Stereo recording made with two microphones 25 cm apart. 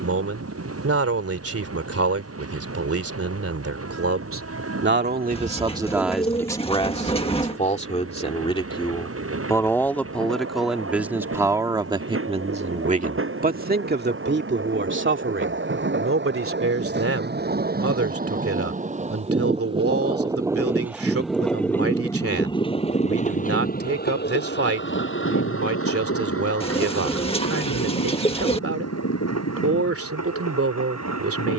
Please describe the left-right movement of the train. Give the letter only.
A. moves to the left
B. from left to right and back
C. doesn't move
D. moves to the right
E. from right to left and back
A.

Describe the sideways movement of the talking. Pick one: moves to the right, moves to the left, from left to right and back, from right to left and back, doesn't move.
from right to left and back.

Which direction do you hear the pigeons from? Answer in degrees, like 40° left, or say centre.
20° left.